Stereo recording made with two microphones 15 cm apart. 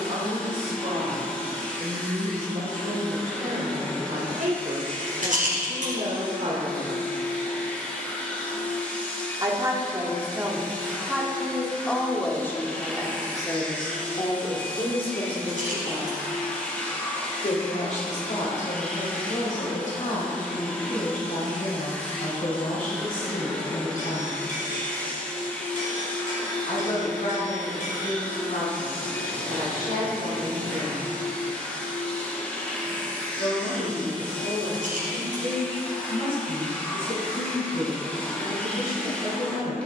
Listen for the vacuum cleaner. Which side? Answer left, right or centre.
centre.